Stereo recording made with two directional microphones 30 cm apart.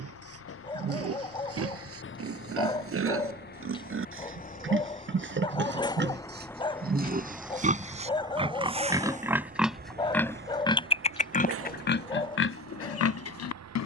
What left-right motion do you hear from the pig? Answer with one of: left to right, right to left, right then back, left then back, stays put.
right to left.